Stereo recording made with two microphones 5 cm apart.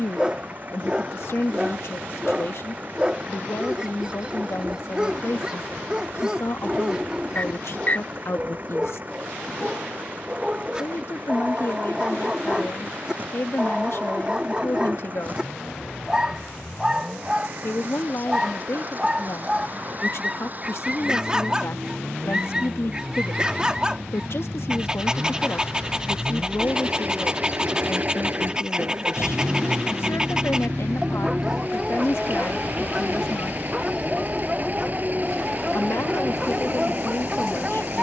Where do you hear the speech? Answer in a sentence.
In this clip you hear the speech on the left.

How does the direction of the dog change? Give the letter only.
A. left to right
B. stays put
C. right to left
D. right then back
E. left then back
B.